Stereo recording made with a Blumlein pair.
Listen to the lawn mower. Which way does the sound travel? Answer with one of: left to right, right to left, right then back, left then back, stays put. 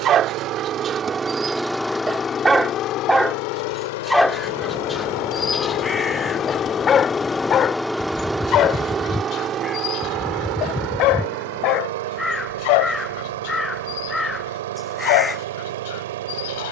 left then back.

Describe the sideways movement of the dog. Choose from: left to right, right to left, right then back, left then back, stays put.
right to left.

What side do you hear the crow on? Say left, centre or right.
centre.